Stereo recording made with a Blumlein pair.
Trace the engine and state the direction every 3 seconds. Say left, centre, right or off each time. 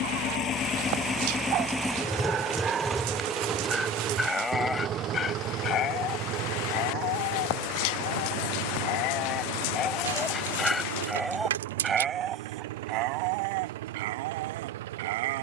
centre, right, right, right, right.